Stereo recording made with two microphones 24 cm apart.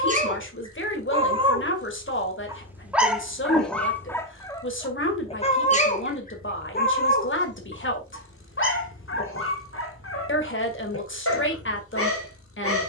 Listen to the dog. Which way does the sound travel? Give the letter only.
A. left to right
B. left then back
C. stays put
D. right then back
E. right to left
E.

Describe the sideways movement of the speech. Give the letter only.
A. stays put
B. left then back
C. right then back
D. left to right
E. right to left
A.